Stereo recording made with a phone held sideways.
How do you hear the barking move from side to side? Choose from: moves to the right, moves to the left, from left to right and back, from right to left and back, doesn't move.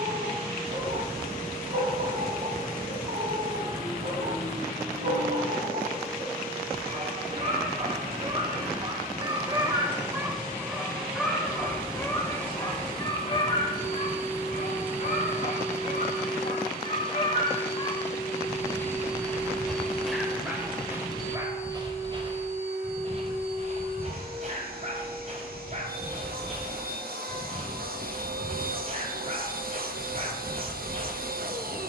from right to left and back.